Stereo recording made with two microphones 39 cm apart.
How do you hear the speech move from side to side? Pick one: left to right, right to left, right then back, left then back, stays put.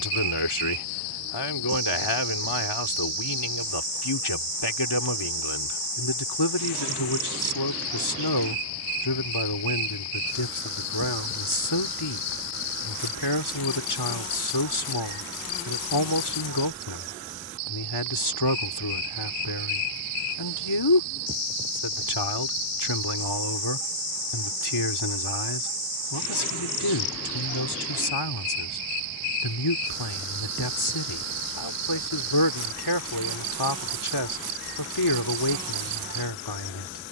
stays put.